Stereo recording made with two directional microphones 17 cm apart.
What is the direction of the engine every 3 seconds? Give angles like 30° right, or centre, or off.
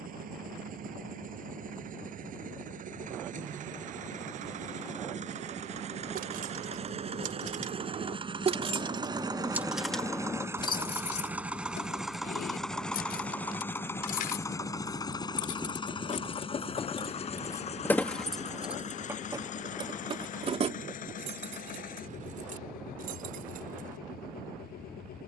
60° right, 50° right, 40° right, 20° right, 10° left, 30° left, 50° left, 60° left, 60° left.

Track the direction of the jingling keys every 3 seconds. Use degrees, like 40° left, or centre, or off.
off, off, 50° right, 20° left, 60° left, 30° left, 20° right, 50° right, off.